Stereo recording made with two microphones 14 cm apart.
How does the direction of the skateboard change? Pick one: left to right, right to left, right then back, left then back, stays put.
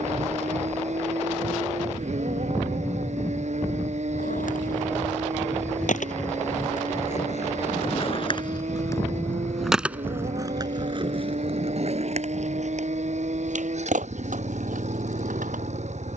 left to right.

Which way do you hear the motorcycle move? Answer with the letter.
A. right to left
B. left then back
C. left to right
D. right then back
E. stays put
E.